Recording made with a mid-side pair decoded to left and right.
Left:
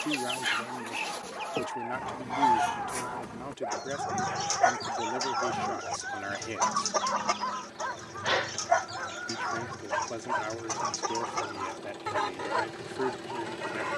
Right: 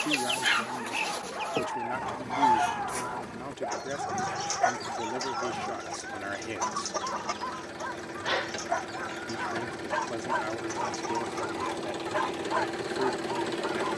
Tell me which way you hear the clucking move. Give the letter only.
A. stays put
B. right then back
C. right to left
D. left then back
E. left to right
C.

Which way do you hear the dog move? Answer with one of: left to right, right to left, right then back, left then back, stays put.
left then back.